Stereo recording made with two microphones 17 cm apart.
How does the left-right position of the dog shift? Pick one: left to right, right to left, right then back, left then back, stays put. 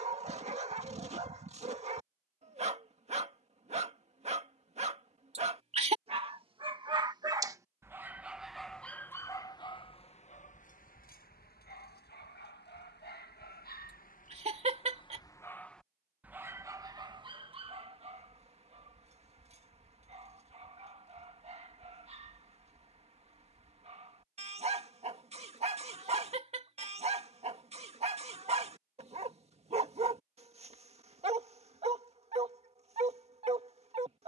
left then back.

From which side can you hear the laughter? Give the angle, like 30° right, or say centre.
40° right.